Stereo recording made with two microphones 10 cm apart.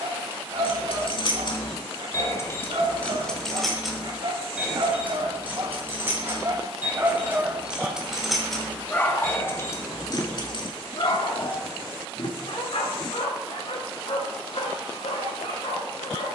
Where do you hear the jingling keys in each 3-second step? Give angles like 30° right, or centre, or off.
40° left, 10° right, 10° right, 40° left, off, off.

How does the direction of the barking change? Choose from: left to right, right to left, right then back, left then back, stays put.
right to left.